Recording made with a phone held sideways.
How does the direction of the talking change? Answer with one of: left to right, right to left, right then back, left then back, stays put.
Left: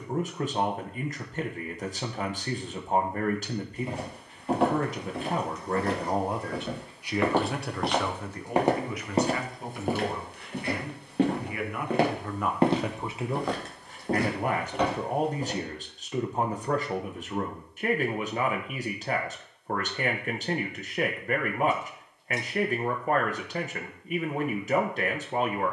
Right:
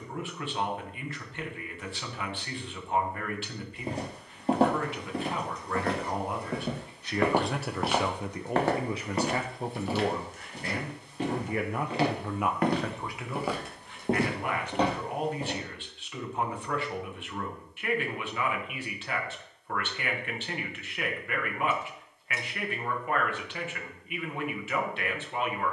right then back.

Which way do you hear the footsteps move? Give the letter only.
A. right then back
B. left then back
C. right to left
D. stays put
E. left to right
B.